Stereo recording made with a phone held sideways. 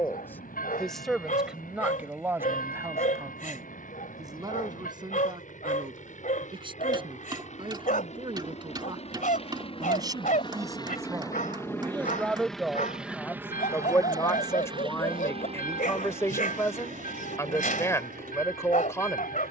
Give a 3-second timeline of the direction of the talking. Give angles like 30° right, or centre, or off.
10° right, 30° right, 30° right, 20° right, 10° left, 20° left, 20° left.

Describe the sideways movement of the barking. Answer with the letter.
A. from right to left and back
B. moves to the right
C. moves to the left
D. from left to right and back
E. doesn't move
E.